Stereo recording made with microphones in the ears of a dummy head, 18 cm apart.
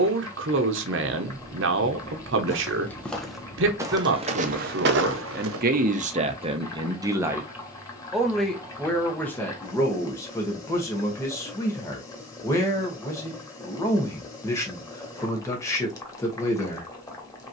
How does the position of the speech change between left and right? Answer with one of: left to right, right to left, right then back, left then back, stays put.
right to left.